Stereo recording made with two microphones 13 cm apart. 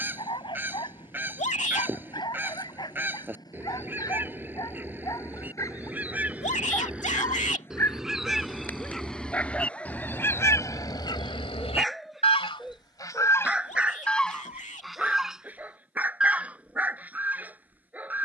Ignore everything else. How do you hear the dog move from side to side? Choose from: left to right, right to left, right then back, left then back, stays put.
left to right.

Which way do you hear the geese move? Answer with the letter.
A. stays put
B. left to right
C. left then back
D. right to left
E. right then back
C.